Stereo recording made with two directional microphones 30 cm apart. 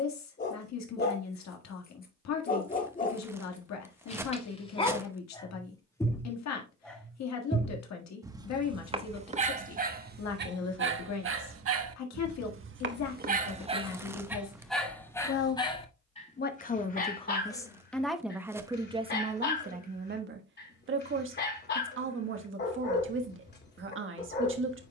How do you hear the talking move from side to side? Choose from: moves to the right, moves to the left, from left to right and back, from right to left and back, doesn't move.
moves to the right.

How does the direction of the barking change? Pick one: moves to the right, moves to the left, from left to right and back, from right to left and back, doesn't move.
from left to right and back.